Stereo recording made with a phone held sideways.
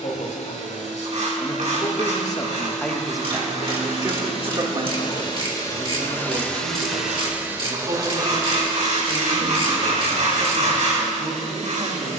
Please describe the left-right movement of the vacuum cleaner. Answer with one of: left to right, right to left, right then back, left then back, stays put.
left to right.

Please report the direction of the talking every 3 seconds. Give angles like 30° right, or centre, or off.
40° left, 40° right, 70° right, 80° right.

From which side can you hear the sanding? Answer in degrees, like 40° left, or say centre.
70° right.